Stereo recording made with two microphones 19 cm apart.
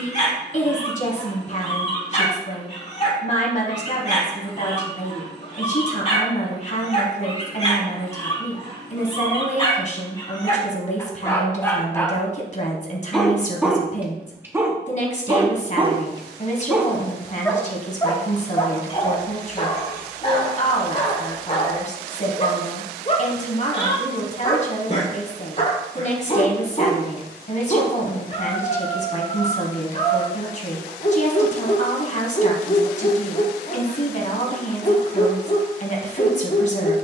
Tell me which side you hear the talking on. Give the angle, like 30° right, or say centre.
40° left.